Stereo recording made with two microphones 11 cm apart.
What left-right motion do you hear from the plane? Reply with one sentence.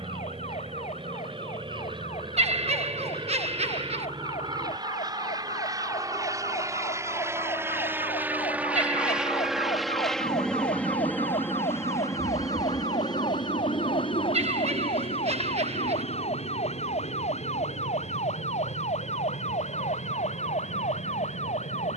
You can hear the plane move from right to left.